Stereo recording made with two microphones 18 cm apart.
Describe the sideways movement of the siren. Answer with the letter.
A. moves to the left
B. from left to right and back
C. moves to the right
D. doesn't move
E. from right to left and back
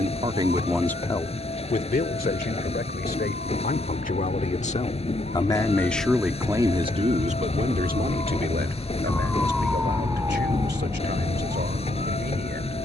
C.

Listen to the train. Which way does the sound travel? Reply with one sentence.
In this clip you hear the train stay put.